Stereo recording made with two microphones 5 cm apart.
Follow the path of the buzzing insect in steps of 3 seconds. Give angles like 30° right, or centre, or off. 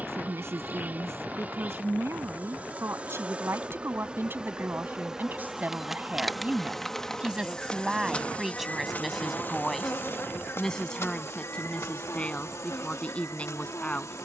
30° right, 20° right, 20° left, 50° left, 70° left.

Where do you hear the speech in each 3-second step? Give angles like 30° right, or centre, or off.
60° right, 40° right, 20° right, 10° left, 20° left.